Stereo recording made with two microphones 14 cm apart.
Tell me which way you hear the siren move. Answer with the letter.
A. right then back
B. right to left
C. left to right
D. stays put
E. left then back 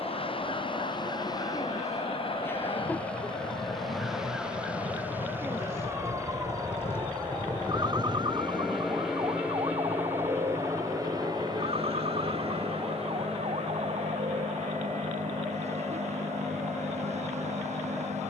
C.